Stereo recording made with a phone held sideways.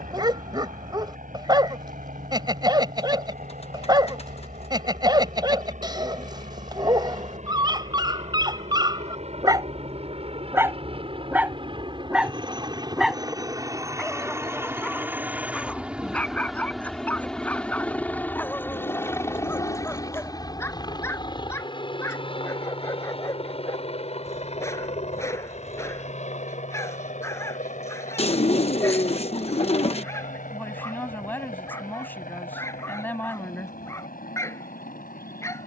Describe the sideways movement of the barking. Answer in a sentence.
You can hear the barking travel towards the left.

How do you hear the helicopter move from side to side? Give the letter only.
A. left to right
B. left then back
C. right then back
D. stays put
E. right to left
E.